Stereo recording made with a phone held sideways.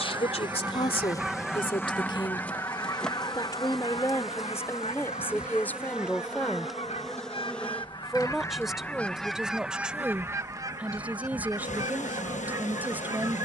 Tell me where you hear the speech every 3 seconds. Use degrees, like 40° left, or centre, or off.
40° left, 20° left, centre, 10° right, 10° right.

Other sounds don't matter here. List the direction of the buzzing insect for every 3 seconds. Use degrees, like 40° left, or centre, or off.
20° left, centre, centre, 60° left, 60° left.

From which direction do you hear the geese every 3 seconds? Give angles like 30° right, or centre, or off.
centre, 50° left, 40° left, 20° right, 20° right.